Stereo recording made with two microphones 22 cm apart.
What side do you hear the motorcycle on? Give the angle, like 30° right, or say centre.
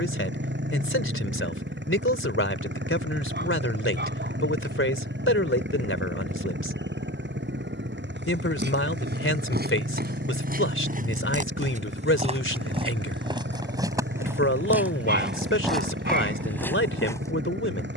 60° right.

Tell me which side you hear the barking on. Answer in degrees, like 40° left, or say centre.
50° right.